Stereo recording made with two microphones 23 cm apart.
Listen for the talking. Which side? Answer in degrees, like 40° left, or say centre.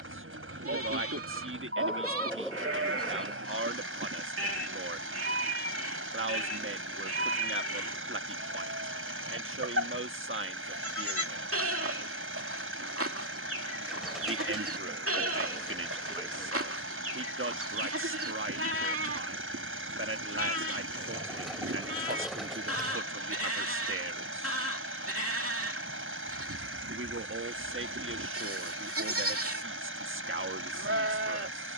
60° right.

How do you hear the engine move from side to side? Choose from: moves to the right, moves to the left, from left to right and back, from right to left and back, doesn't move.
doesn't move.